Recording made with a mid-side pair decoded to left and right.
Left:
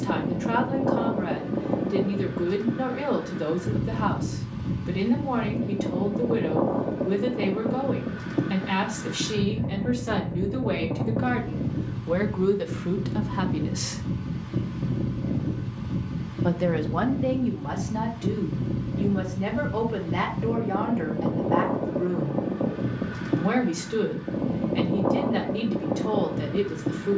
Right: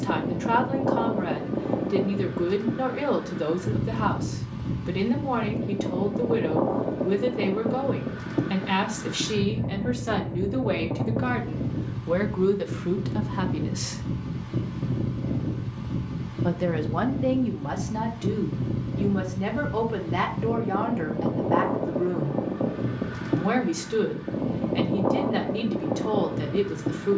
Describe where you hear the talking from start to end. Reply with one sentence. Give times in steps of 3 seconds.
You can hear the talking on the right from 0 s, in the centre from 12 s and on the right from 18 s.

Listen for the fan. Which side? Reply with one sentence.
In this clip you hear the fan in the centre.